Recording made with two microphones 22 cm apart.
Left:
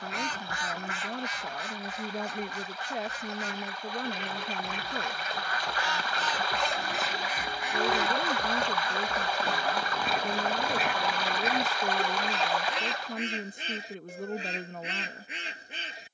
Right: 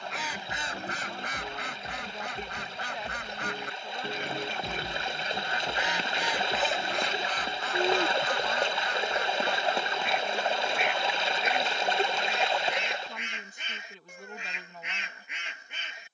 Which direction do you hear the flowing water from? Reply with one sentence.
In this clip you hear the flowing water on the right.